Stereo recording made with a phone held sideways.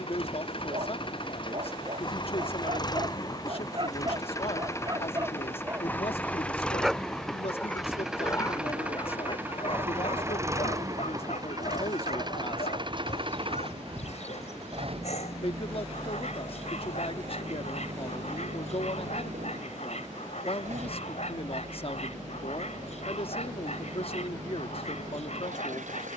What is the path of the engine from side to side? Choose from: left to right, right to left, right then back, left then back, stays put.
left to right.